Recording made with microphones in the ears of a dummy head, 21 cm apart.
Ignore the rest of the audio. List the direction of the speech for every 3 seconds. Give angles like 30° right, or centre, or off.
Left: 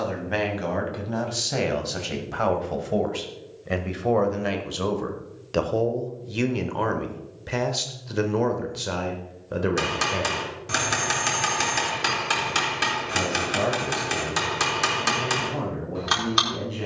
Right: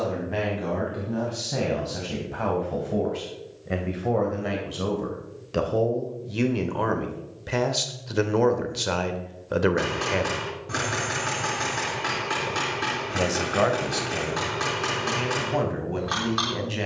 50° left, 30° left, centre, 30° right, 60° right, 70° right.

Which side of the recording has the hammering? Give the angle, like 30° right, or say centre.
60° left.